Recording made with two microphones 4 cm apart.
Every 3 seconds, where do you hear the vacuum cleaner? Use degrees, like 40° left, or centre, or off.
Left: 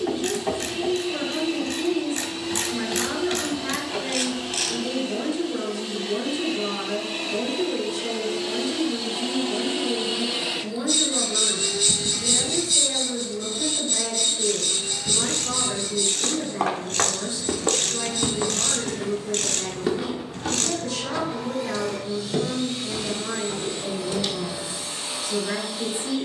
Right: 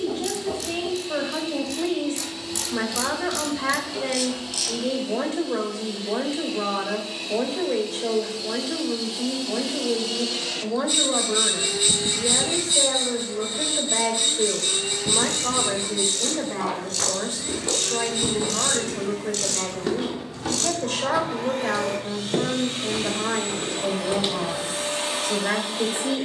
60° left, 60° left, 50° left, 10° left, 50° right, 60° right, 60° right, 60° right, 60° right.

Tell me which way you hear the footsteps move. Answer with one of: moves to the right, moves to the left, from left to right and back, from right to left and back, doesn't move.
moves to the right.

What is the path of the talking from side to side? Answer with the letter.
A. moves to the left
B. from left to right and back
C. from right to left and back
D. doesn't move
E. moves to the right
D.